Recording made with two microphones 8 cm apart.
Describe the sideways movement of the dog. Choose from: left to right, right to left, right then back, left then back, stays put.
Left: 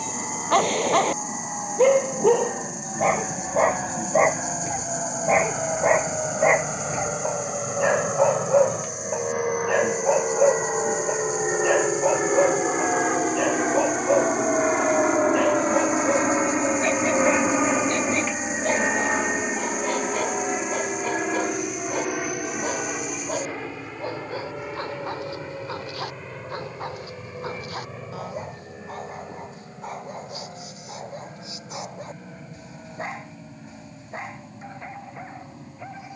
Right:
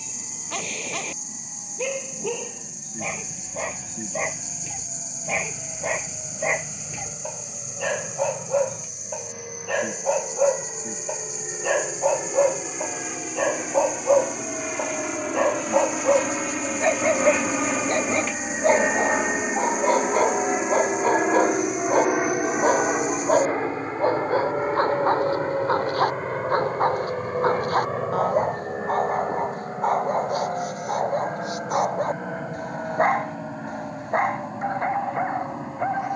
left to right.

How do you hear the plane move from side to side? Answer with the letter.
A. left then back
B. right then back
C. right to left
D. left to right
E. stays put
D.